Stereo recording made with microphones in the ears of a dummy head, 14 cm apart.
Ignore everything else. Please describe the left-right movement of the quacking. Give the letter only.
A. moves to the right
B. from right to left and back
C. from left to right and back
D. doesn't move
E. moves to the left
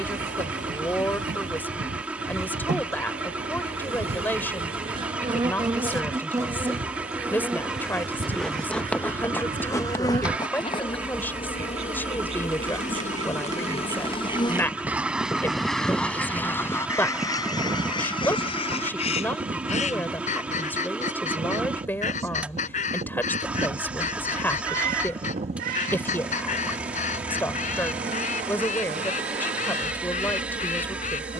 E.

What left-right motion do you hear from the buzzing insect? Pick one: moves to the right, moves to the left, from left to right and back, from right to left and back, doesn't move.
from right to left and back.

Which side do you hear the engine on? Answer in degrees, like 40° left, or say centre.
10° right.